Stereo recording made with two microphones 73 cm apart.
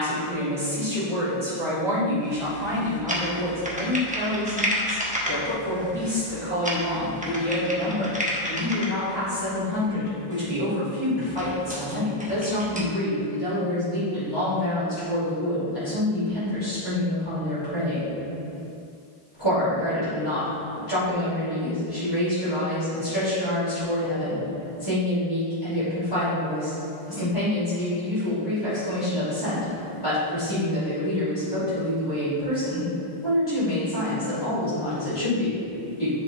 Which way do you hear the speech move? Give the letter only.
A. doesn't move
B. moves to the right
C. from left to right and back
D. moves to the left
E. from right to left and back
D.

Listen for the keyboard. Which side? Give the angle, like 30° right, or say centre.
10° right.